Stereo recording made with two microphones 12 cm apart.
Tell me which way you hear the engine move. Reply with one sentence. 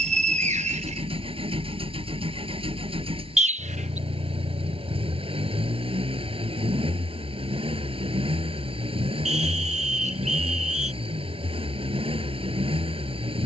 In this clip you hear the engine stay in one place.